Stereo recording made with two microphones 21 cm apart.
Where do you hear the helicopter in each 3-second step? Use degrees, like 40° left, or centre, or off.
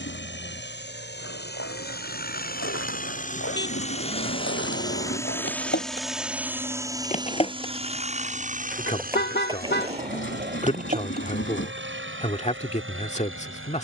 50° left, 20° left, 20° right, 50° right, 60° right.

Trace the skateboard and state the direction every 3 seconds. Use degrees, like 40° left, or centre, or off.
70° left, 60° left, 20° left, 30° right, off.